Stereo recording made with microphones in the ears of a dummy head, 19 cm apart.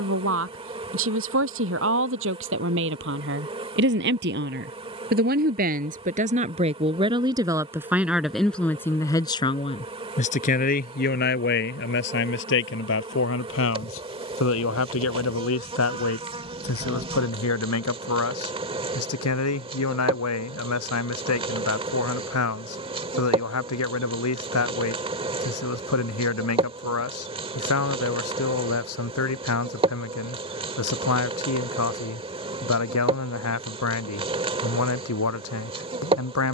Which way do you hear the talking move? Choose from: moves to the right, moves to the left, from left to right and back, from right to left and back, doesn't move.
moves to the left.